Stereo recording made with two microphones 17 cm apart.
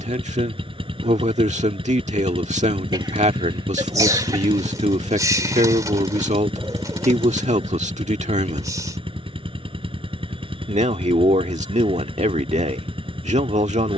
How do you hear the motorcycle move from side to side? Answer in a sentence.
In this clip you hear the motorcycle stay put.